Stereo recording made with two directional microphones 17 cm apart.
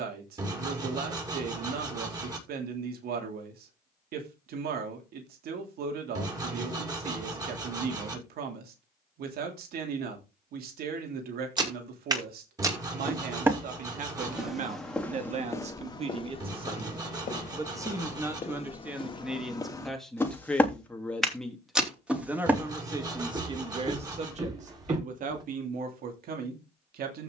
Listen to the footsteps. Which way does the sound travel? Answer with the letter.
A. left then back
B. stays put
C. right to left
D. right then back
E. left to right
A.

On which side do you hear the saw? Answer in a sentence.
In this clip you hear the saw on the right.